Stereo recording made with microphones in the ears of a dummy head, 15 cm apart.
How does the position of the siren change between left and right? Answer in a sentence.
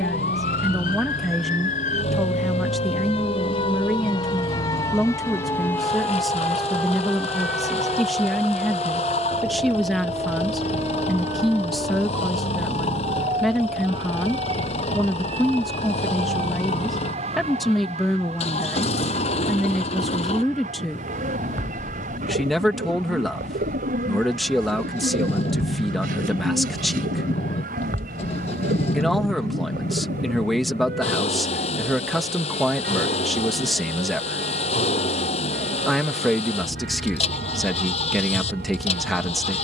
You can hear the siren move from left to right.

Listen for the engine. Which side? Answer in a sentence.
You can hear the engine on the left.